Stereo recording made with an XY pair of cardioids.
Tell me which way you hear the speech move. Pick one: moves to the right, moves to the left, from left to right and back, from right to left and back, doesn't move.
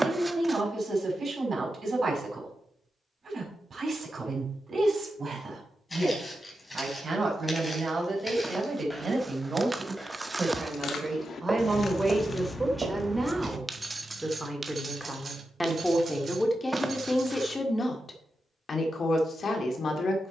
moves to the left.